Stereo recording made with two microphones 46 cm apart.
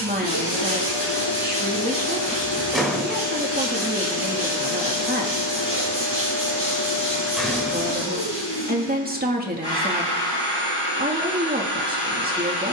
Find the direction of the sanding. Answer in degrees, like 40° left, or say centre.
50° right.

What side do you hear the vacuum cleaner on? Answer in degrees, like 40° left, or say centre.
80° left.